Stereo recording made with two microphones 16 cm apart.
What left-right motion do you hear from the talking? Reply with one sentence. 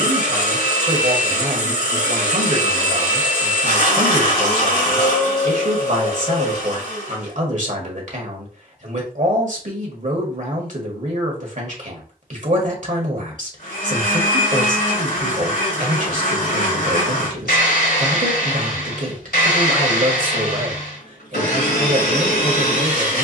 You can hear the talking stay in one place.